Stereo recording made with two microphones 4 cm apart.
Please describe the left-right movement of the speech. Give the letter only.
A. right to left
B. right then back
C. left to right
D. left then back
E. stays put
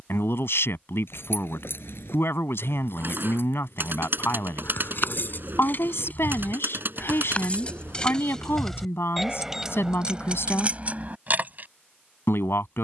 E.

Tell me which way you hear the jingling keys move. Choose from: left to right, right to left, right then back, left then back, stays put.
left to right.